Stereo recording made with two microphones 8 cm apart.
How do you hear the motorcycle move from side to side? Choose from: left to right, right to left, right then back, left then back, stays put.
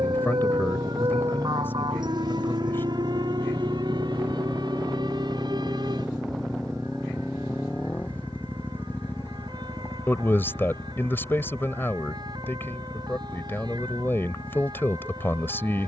right to left.